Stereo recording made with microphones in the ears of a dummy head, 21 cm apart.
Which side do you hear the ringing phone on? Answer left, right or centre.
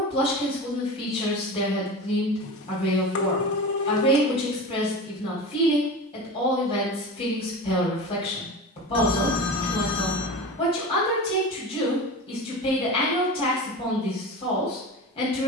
left.